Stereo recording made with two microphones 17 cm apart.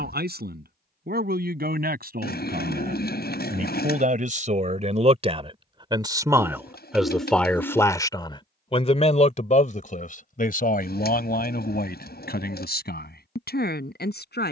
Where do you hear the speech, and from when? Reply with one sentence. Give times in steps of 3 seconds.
In this clip you hear the speech on the right from 0 s, in the centre from 6 s and on the left from 9 s.